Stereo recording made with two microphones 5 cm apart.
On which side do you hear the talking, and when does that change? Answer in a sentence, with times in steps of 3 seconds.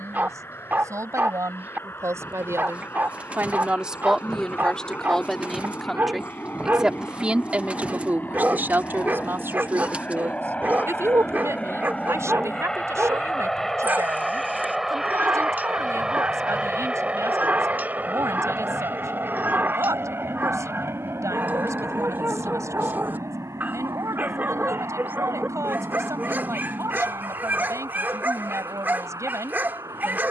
You can hear the talking on the right from 0 s, in the centre from 3 s and on the right from 6 s.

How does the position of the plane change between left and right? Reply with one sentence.
In this clip you hear the plane move to the right.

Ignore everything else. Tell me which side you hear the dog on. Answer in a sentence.
In this clip you hear the dog on the right.